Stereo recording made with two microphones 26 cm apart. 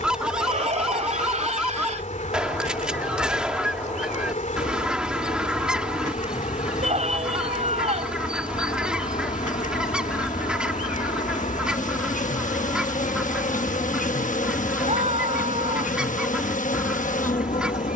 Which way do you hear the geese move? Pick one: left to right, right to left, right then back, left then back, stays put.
stays put.